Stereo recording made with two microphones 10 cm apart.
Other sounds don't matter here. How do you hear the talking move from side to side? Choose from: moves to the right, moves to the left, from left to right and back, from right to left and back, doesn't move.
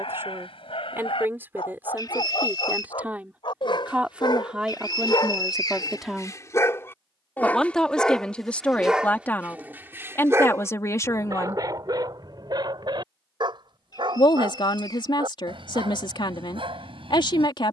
moves to the left.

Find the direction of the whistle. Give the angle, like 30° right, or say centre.
40° left.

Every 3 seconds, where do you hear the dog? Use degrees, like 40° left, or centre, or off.
70° left, 50° left, 20° left, 30° right, 50° right, 70° right.